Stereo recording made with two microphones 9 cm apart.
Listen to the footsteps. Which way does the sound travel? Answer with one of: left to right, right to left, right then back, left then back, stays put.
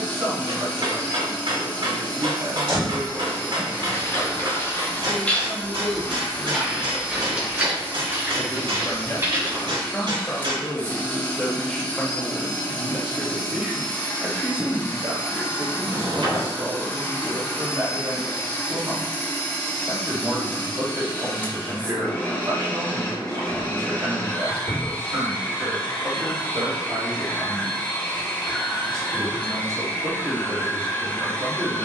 left to right.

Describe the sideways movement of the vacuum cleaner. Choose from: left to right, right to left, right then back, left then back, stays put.
stays put.